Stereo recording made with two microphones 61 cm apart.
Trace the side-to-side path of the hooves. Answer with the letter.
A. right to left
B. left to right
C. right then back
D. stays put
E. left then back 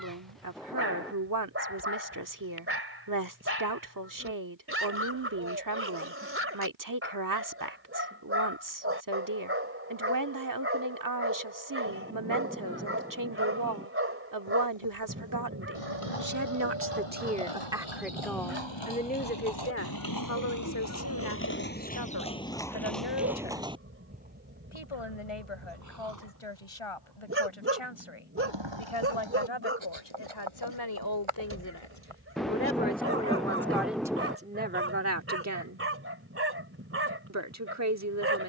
B.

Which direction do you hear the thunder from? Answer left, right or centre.
centre.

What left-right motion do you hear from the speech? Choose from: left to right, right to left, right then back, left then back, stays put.
left then back.